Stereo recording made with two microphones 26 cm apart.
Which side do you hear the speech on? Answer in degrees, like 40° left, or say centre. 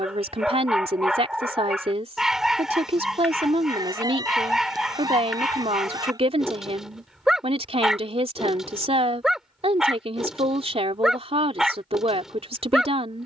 20° right.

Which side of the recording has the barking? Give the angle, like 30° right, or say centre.
centre.